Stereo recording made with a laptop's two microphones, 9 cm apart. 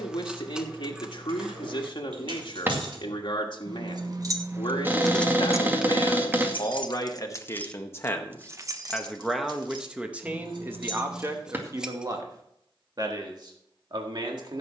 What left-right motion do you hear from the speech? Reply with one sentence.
In this clip you hear the speech go from the left side to the right.